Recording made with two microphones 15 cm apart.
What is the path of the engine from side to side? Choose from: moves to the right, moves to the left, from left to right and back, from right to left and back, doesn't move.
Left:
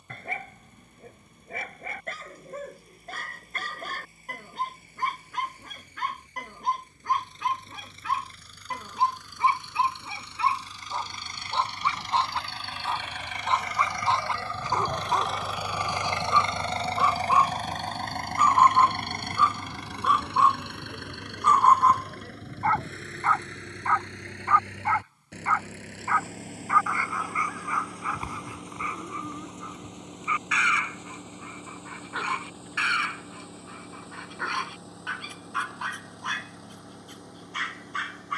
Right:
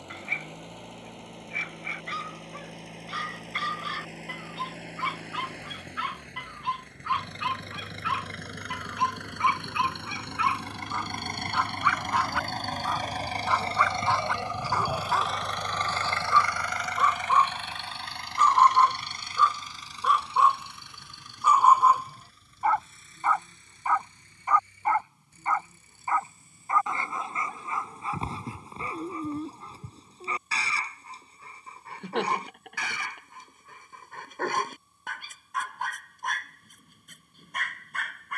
moves to the left.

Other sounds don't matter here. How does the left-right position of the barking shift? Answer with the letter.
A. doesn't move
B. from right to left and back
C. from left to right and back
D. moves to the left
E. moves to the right
E.